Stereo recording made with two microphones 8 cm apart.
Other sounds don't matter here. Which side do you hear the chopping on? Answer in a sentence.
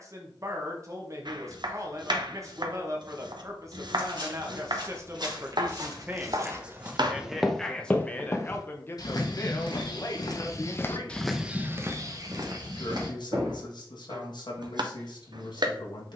In this clip you hear the chopping on the right.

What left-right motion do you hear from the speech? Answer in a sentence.
In this clip you hear the speech move from right to left.